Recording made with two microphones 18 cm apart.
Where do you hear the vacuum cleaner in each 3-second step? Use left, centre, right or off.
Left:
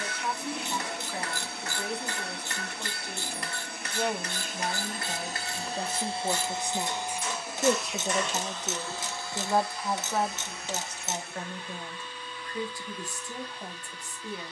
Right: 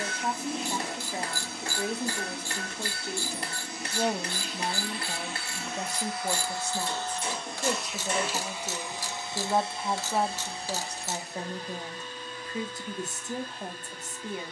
left, left, centre, right, right.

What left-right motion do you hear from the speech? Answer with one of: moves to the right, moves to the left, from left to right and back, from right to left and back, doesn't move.
from right to left and back.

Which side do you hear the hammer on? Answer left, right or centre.
right.